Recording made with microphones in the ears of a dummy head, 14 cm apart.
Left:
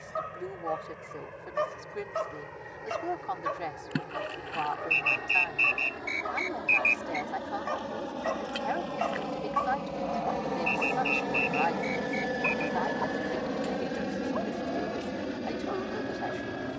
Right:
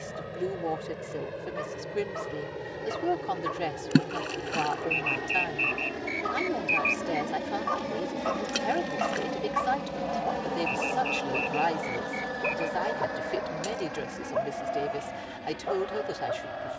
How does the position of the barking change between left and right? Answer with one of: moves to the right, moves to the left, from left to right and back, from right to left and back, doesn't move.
moves to the right.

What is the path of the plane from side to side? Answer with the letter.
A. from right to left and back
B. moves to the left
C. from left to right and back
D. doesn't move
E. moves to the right
B.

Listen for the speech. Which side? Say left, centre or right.
right.